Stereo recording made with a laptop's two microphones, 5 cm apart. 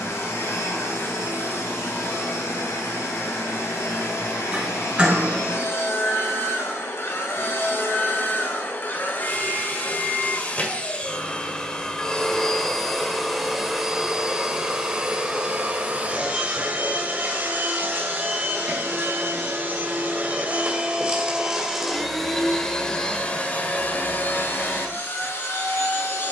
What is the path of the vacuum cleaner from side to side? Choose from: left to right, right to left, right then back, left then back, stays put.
right then back.